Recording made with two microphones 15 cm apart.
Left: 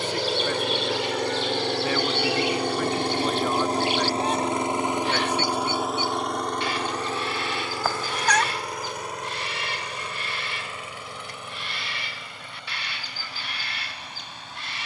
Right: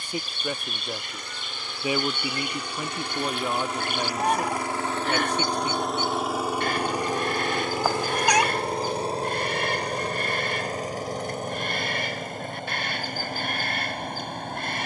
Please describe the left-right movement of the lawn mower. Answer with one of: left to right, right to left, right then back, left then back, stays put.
left to right.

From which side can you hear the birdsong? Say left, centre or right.
right.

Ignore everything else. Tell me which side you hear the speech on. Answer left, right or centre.
centre.